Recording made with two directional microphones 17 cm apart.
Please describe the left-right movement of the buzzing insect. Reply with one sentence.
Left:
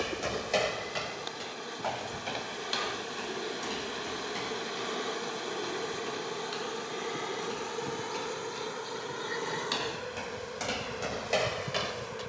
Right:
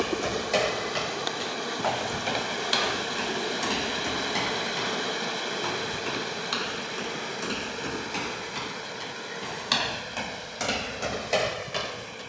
You can hear the buzzing insect travel towards the left.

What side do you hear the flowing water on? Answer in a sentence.
You can hear the flowing water on the right.